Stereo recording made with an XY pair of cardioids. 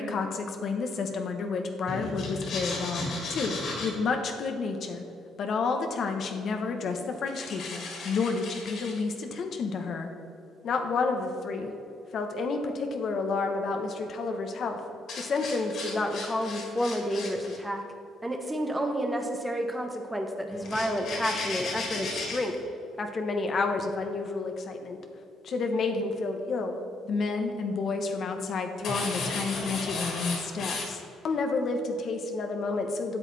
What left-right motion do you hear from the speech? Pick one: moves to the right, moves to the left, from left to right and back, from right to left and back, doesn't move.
from left to right and back.